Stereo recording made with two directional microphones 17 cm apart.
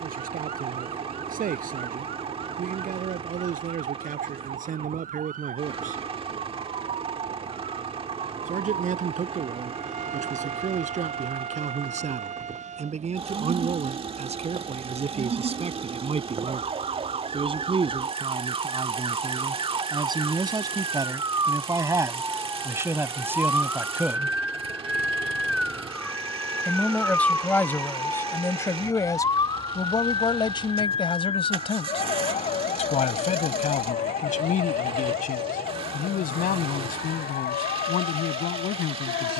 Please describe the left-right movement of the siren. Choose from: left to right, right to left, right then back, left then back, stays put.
right to left.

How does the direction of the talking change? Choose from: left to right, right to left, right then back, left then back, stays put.
right to left.